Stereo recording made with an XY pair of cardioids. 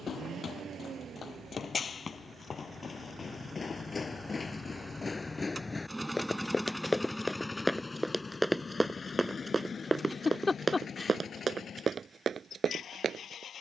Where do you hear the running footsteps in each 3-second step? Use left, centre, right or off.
left, left, centre, right, right.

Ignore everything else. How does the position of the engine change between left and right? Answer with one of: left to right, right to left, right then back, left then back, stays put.
right to left.